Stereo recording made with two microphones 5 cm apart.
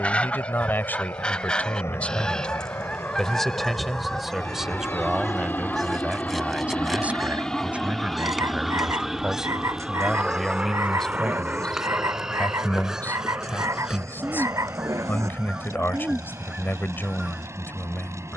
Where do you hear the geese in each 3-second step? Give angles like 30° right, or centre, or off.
20° left, centre, centre, 10° right, 10° right, 20° right.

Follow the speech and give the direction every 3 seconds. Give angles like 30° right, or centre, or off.
30° left, 10° right, 30° right, centre, 40° left, 40° left.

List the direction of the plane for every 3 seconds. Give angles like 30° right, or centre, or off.
70° left, 50° left, 10° left, 20° right, 40° right, 50° right.